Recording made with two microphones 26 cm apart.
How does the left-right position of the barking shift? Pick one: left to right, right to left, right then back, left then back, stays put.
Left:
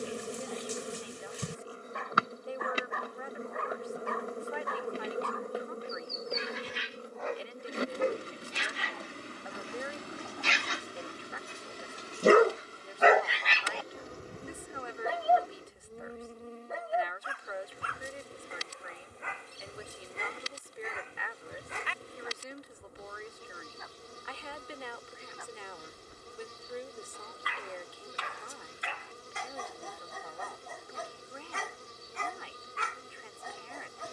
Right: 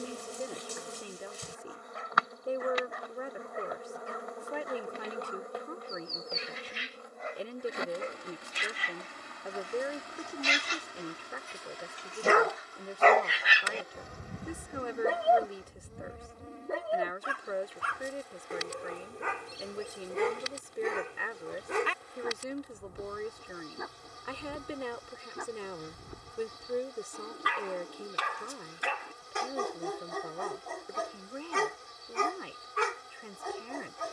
left to right.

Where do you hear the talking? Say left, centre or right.
right.